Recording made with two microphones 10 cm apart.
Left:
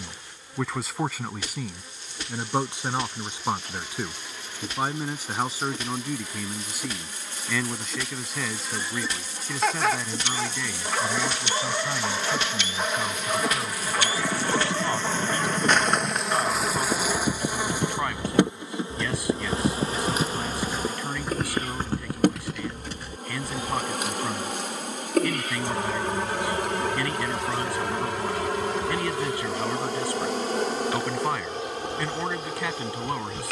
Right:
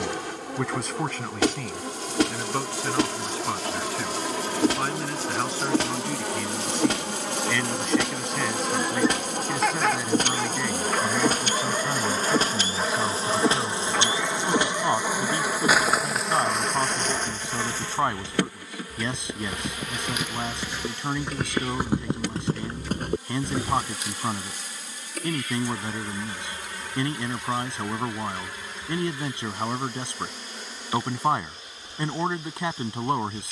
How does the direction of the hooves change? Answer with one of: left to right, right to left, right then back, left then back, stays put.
left to right.